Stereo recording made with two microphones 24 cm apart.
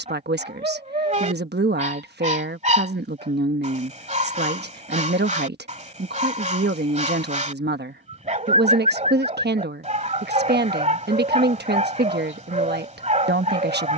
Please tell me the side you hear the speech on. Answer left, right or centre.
right.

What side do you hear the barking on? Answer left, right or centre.
right.